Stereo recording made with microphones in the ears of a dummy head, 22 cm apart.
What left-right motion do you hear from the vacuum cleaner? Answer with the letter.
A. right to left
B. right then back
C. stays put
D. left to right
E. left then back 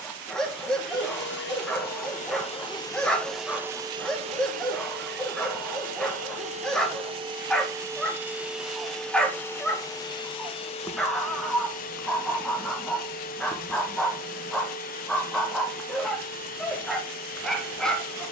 B.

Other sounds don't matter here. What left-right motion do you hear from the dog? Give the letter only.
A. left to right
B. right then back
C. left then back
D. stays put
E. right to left
D.